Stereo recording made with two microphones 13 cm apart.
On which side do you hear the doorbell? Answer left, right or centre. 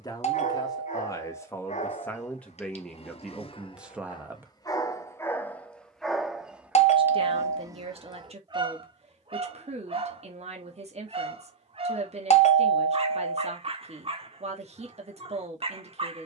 left.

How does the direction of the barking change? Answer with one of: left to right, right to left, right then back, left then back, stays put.
left to right.